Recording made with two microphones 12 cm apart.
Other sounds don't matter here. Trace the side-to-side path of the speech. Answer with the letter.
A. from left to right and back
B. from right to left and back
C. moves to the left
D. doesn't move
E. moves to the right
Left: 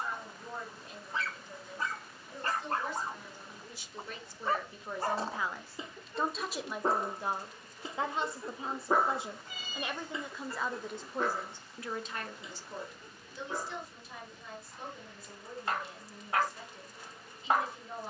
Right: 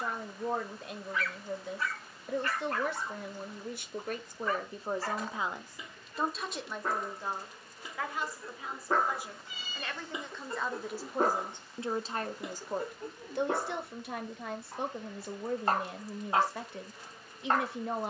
B.